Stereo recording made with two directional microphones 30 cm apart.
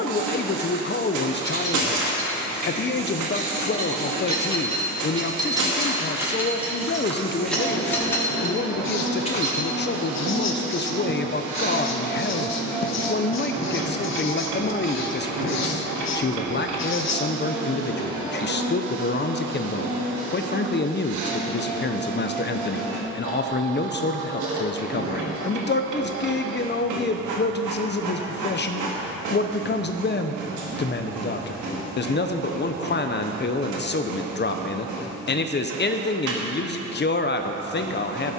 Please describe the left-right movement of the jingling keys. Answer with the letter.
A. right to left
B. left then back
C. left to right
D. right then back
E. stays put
A.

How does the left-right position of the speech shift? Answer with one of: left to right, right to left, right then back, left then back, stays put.
stays put.